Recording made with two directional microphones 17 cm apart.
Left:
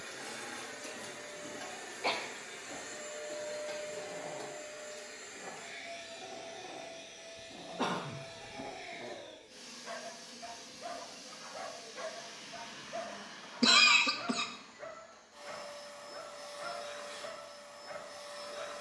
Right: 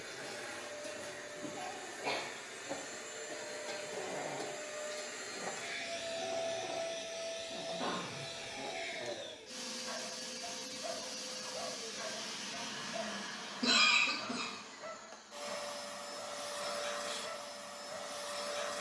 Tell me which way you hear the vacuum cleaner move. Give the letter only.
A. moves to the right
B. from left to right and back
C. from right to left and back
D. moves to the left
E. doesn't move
A.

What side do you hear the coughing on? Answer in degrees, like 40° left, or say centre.
60° left.